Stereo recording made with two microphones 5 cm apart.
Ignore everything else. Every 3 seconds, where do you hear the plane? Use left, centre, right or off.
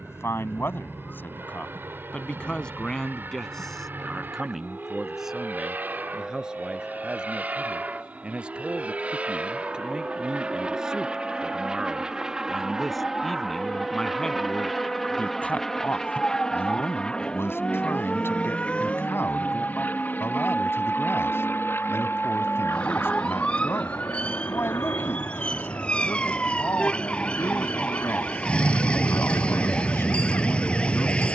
right, right, right, right, centre, centre, left, left, left, left, left.